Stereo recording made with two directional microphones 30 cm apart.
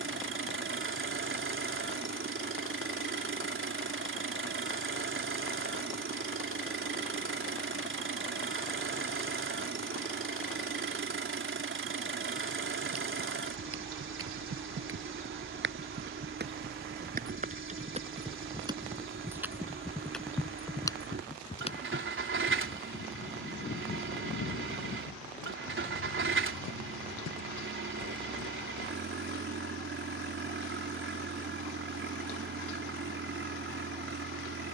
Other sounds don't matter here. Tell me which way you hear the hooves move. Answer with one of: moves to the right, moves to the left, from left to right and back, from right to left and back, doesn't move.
moves to the left.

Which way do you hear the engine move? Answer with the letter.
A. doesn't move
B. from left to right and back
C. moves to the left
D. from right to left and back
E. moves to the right
A.